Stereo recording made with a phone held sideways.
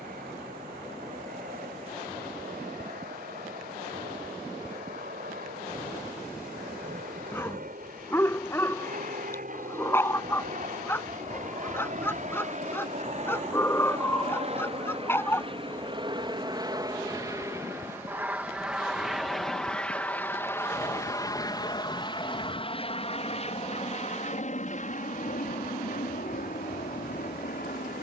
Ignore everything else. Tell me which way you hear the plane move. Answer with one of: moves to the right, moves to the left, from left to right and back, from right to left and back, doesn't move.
moves to the left.